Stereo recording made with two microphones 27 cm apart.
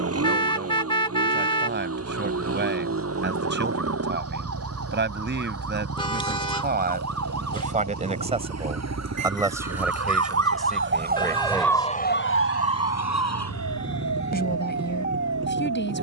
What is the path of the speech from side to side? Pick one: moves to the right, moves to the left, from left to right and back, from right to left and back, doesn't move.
moves to the left.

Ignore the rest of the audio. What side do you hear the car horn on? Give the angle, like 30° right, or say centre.
20° left.